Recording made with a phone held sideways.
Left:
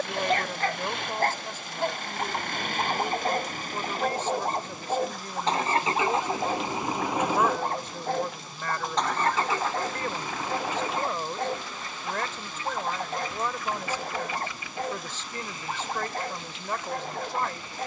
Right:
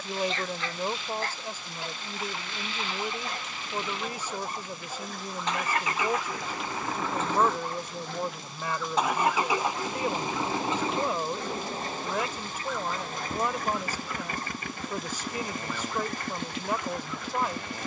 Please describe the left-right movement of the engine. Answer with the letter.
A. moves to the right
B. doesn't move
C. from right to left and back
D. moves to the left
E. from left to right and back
A.